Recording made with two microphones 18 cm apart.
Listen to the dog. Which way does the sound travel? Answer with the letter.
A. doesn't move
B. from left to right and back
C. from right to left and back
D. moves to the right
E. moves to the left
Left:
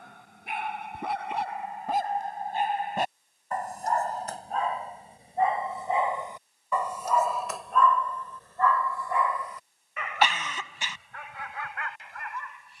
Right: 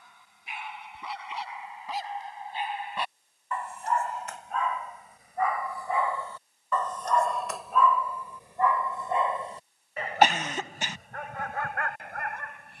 D.